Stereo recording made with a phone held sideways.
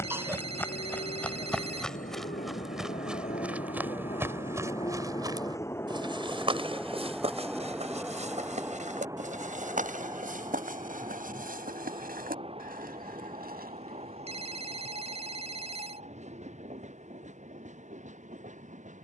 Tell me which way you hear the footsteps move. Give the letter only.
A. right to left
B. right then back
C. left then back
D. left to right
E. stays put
D.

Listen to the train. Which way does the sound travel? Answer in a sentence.
You can hear the train move to the right.